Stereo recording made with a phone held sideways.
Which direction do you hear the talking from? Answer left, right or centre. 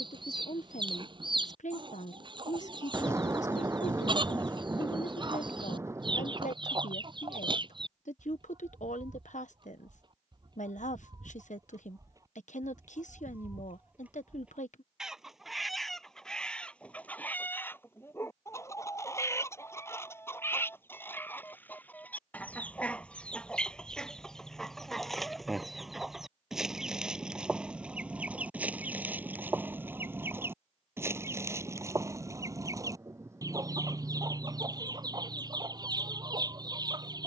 left.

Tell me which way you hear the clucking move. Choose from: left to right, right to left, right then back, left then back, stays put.
left then back.